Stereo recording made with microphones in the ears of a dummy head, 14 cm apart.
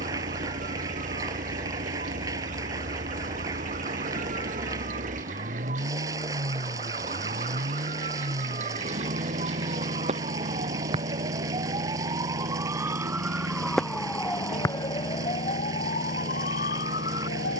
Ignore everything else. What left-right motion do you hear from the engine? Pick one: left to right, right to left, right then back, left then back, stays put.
stays put.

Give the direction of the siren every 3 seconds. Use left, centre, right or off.
right, right, right, right, centre, left.